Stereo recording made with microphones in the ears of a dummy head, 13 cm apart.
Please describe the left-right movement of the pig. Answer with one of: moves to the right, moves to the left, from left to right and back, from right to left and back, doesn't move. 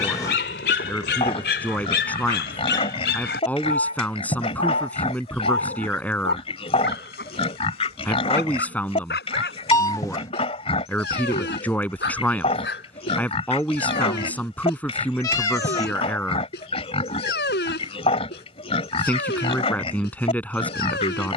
doesn't move.